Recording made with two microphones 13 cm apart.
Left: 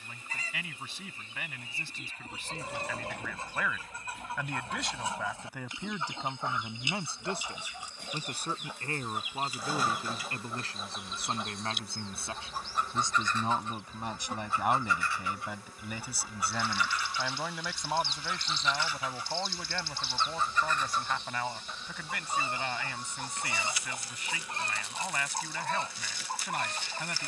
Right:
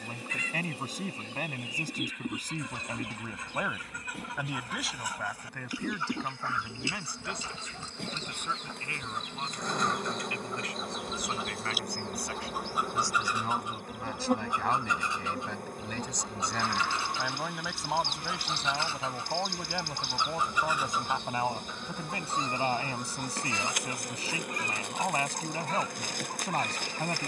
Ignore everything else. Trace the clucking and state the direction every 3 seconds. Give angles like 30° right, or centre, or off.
40° left, 30° left, 20° left, centre, 10° right, 30° right, 20° right, 10° left, 30° left.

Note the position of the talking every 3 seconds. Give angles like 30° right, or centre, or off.
40° right, 10° right, 30° left, 30° left, 20° left, centre, 10° right, 30° right, 30° right.